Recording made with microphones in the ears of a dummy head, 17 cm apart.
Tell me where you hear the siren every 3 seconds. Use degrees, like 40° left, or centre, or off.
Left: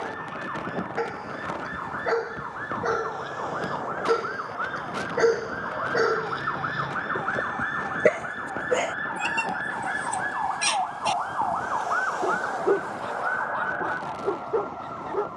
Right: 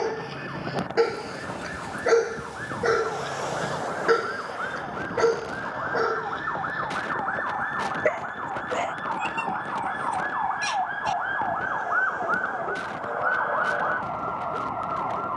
60° left, 50° left, 30° left, centre, 40° right.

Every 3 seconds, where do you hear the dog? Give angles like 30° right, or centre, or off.
40° right, centre, 40° left, 60° left, 70° left.